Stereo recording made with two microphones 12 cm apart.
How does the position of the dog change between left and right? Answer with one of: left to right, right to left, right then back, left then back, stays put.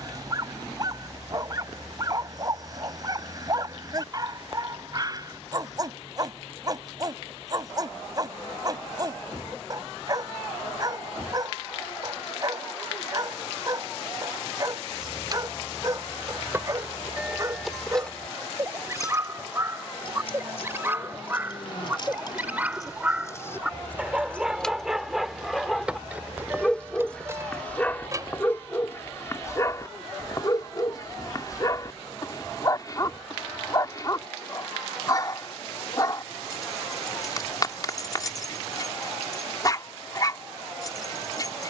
right to left.